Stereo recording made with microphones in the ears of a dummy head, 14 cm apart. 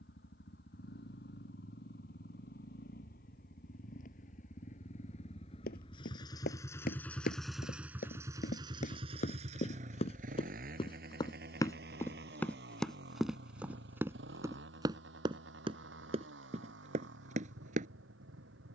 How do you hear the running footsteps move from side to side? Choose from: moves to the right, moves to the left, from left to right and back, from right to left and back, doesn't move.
moves to the right.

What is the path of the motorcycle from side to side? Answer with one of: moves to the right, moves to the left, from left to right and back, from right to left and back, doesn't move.
moves to the right.